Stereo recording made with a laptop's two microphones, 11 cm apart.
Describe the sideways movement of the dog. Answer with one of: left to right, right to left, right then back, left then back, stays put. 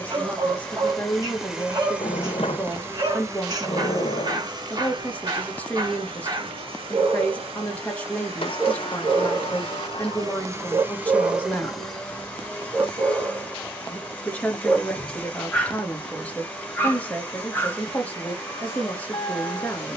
right to left.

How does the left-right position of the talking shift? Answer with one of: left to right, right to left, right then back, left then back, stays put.
stays put.